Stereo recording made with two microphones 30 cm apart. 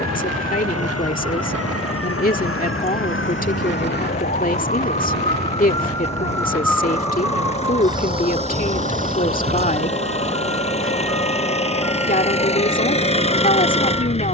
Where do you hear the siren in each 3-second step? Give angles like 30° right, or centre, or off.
50° left, 30° left, 10° right, 40° right, 50° right.